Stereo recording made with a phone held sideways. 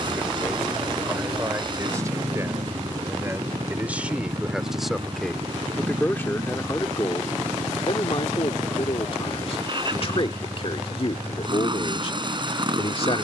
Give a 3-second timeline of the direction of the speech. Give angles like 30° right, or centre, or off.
20° right, 10° right, 30° left, 40° left, 40° left.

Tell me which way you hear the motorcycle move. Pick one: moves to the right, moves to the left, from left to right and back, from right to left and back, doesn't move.
doesn't move.